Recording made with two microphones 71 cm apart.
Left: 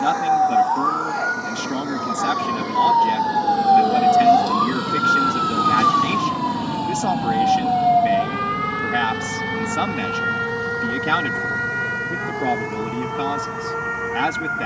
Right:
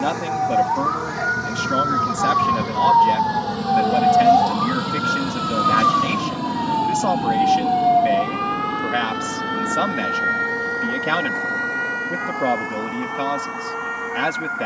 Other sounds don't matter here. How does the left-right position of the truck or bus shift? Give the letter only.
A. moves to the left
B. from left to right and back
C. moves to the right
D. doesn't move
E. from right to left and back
A.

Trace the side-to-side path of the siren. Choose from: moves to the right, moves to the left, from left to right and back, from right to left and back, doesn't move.
moves to the left.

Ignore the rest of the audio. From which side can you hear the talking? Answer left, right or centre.
centre.